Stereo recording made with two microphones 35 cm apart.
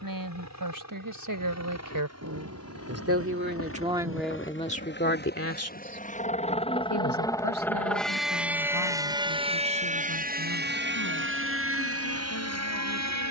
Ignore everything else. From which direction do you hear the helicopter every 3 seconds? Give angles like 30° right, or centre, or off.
50° left, 30° left, 10° left, 30° right, 50° right.